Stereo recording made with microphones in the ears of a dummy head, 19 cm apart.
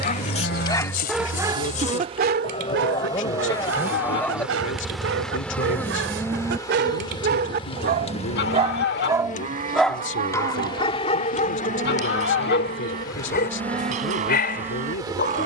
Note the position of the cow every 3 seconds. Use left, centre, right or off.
left, centre, right, right, right.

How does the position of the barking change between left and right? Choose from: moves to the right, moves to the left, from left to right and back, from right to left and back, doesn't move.
from left to right and back.